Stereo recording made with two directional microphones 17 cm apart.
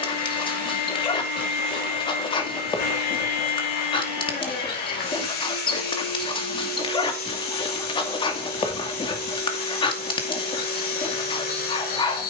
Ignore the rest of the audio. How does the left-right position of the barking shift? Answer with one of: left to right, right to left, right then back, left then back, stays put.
stays put.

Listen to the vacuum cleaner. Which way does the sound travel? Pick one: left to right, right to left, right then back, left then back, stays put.
stays put.